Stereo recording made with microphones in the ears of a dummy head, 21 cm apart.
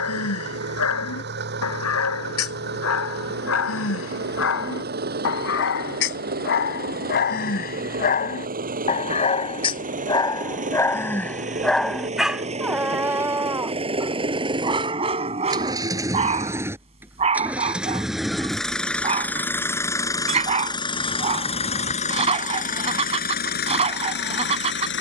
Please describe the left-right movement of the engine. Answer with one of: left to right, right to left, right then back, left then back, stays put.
right to left.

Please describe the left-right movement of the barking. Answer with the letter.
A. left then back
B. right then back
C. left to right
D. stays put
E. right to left
C.